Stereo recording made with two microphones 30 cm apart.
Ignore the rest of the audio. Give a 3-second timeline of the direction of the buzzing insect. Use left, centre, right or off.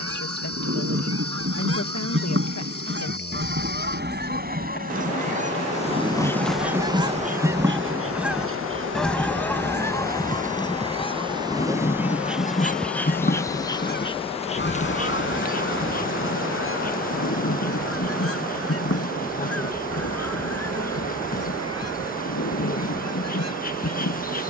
left, left, right, right, centre, left, left, left.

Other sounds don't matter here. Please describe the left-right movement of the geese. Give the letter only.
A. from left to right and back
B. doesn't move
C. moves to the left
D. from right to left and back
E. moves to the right
C.